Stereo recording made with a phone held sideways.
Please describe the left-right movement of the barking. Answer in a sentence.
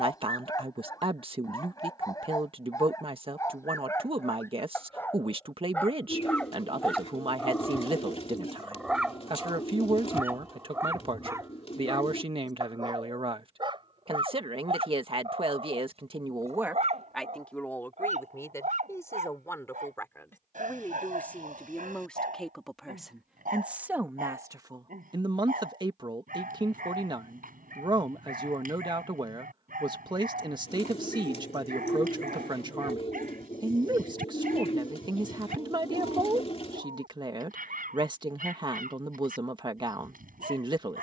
In this clip you hear the barking move to the right.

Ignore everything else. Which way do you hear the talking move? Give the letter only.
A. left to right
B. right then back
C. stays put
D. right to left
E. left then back
E.